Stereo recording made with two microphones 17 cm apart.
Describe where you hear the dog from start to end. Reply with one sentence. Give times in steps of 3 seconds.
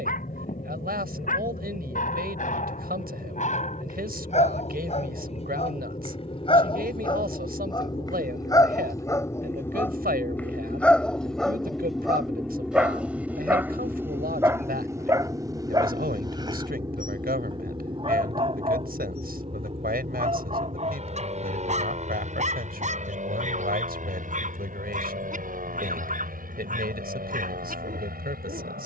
You can hear the dog on the left from 0 s, in the centre from 9 s and on the right from 15 s.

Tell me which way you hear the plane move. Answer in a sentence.
You can hear the plane move from left to right.